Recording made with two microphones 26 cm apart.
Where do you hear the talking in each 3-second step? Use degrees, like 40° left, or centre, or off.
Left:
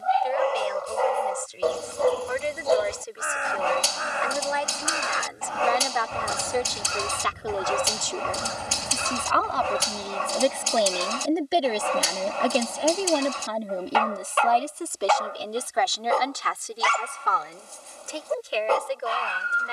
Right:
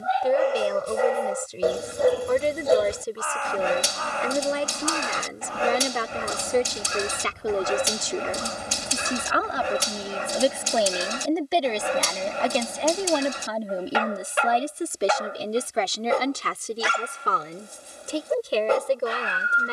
50° right, 40° right, 30° right, 10° right, centre, 30° right, 50° right.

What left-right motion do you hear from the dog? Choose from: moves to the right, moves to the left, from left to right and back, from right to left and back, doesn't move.
doesn't move.